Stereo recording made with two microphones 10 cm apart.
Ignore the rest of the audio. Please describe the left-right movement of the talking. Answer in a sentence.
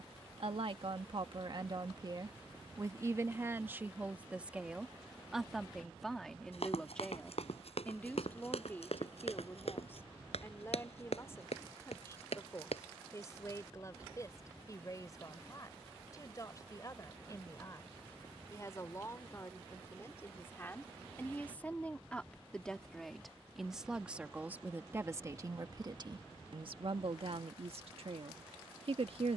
In this clip you hear the talking move from right to left and back again.